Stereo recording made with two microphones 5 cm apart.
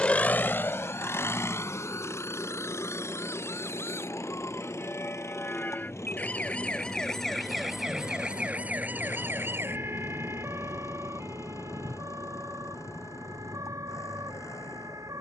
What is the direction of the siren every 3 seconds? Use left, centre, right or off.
left, left, centre, right, right.